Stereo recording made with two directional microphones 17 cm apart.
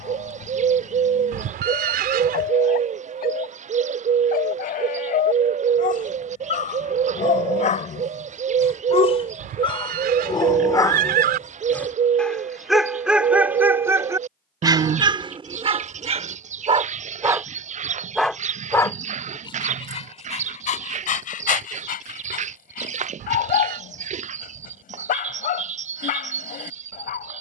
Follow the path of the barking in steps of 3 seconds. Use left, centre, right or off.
left, left, left, left, centre, right, left, left, left.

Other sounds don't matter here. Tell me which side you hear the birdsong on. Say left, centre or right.
right.